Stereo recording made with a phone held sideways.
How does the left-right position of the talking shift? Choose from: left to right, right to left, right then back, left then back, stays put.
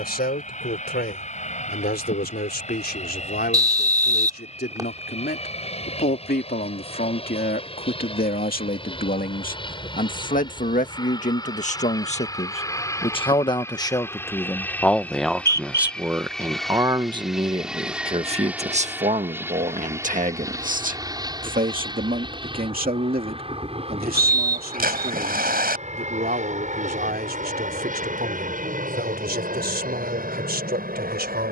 left to right.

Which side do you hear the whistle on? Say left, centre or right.
right.